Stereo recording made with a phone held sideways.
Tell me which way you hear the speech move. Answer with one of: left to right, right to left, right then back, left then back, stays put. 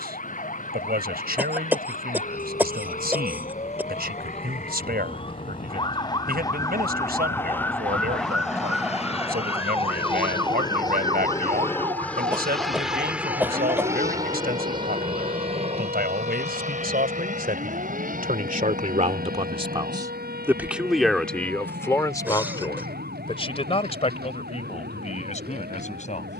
right to left.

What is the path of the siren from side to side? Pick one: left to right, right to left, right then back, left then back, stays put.
left to right.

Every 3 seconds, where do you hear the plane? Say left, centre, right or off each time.
left, left, left, left, centre, right, right, right, right.